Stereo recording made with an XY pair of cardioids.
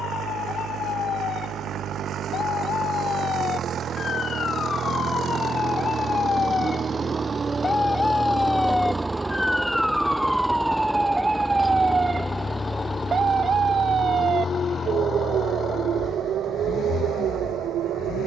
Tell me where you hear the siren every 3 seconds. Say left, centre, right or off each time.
left, left, left, centre, right, right.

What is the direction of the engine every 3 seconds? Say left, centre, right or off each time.
right, right, right, centre, left, left.